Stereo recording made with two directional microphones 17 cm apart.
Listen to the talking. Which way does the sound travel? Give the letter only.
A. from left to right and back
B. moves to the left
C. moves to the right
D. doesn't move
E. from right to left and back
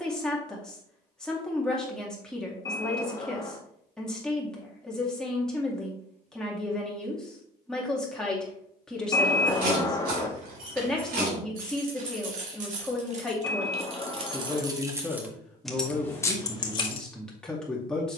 D.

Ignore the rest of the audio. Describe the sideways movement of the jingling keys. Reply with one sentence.
You can hear the jingling keys go from the right side to the left.